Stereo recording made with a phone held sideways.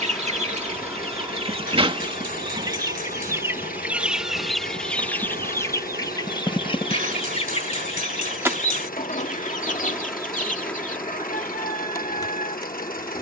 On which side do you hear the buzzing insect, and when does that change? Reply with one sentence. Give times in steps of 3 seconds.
You can hear the buzzing insect on the right from 0 s, in the centre from 9 s and on the left from 12 s.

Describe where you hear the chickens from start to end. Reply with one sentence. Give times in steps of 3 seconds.
In this clip you hear the chickens on the right from 0 s, in the centre from 3 s and on the left from 6 s.